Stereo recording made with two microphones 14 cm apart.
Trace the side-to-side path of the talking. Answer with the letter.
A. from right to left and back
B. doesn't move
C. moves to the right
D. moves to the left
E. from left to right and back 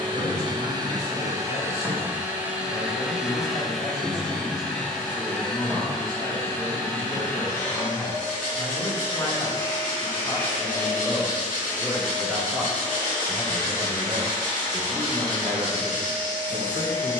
C.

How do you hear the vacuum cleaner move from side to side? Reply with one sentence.
In this clip you hear the vacuum cleaner travel towards the left.